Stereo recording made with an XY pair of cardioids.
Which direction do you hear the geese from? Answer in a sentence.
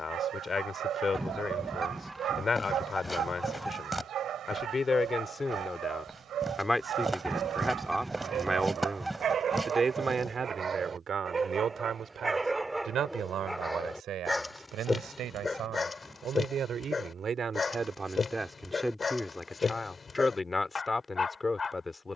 You can hear the geese in the centre.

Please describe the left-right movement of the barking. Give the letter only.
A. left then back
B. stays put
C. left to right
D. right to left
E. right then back
D.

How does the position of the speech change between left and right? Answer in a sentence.
You can hear the speech go right and come back.